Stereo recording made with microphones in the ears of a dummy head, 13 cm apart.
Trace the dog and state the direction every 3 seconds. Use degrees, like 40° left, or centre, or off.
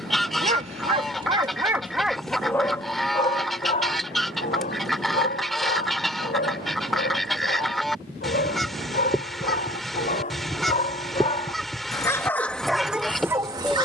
20° right, 50° left, 60° left, 50° left, 10° right.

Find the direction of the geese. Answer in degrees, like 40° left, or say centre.
centre.